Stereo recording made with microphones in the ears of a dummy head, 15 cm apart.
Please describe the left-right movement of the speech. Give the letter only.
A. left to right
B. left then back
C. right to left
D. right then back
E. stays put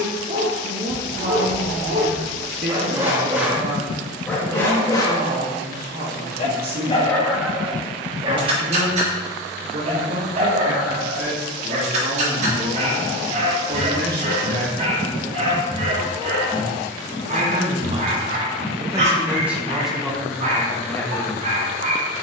C.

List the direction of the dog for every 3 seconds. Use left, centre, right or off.
right, centre, centre, right, right, right, right, right.